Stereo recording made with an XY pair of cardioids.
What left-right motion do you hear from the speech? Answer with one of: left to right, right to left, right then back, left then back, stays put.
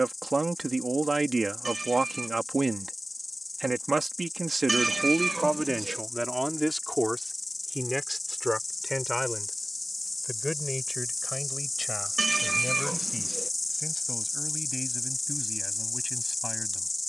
right to left.